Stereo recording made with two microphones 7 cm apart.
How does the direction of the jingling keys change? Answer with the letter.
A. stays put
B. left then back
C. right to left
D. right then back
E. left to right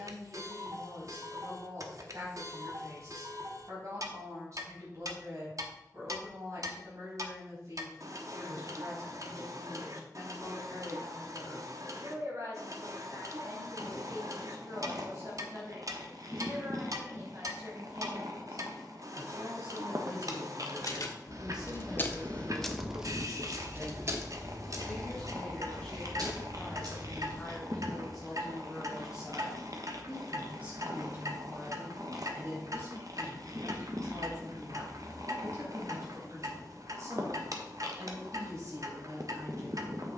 E.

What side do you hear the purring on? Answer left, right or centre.
right.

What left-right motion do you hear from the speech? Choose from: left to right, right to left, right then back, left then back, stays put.
left then back.